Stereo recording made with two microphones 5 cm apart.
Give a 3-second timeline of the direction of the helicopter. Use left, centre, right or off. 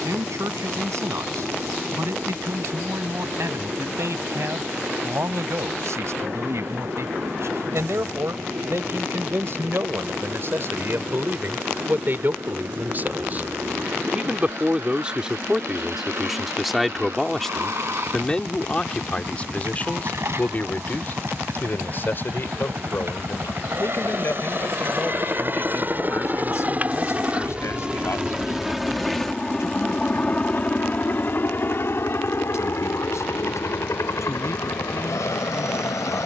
right, right, right, right, right, right, right, right, right, centre, left, left.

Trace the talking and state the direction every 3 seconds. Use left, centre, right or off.
right, right, right, right, right, centre, left, left, left, left, left, left.